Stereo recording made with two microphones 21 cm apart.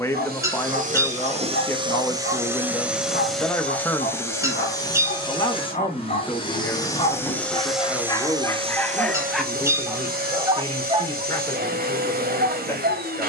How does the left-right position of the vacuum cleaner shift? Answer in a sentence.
In this clip you hear the vacuum cleaner move from right to left and back again.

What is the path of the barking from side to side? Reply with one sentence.
You can hear the barking move from left to right.